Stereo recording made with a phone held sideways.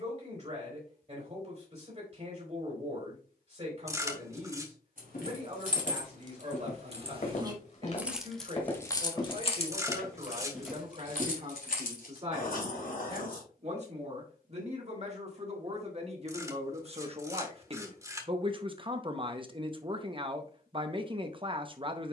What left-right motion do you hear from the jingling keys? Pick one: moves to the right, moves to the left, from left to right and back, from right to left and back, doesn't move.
moves to the left.